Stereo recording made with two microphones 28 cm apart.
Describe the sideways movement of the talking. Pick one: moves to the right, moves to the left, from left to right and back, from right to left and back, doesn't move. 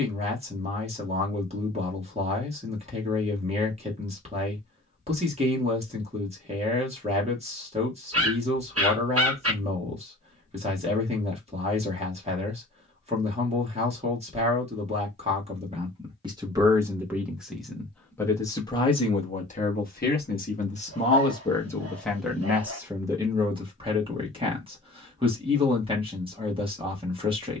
from right to left and back.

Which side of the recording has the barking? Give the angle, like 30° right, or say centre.
50° right.